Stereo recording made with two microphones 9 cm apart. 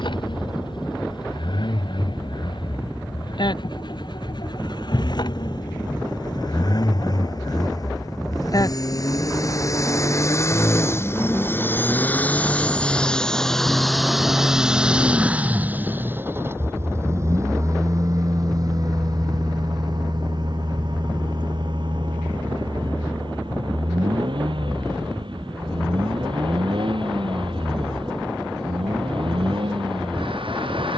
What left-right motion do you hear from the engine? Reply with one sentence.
In this clip you hear the engine go from the left side to the right.